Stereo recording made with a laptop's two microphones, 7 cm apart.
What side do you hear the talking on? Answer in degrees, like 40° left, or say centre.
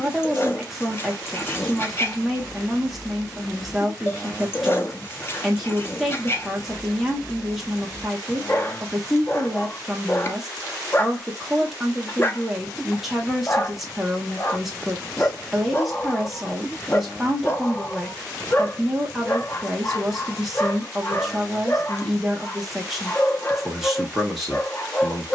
centre.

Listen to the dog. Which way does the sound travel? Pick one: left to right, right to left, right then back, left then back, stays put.
stays put.